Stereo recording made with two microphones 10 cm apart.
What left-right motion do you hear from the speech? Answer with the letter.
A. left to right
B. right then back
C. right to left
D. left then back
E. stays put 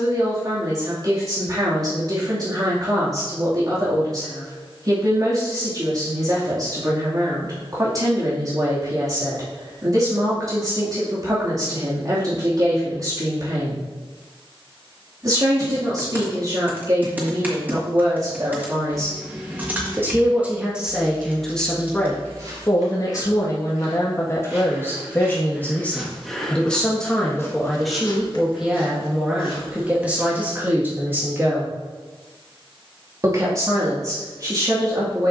D.